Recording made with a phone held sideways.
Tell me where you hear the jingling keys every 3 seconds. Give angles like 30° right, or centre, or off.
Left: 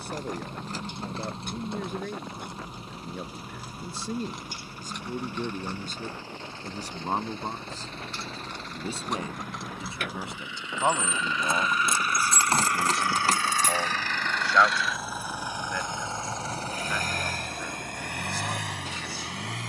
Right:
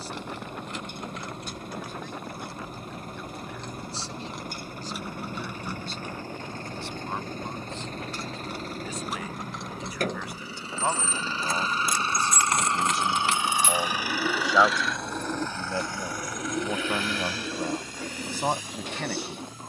30° left, centre, 10° right, 10° left, 30° left, off, off.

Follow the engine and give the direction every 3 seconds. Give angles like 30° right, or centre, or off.
50° right, 50° right, 40° right, 40° right, 10° right, 30° left, 70° left.